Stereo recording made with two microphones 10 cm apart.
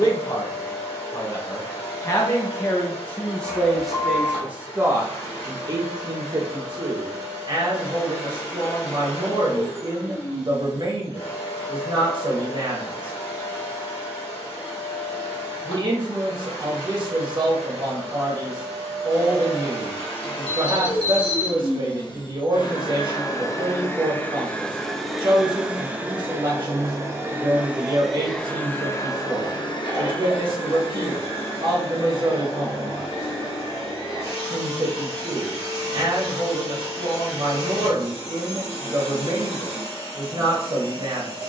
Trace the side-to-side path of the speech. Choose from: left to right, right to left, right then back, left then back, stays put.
left to right.